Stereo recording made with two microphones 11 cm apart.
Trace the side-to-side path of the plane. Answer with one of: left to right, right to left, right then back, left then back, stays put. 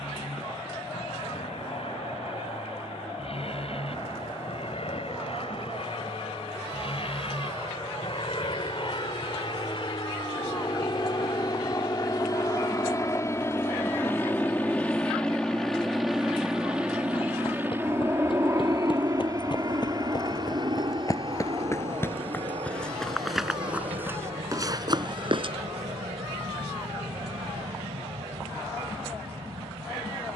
left to right.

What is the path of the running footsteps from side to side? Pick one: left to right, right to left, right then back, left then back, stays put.
left to right.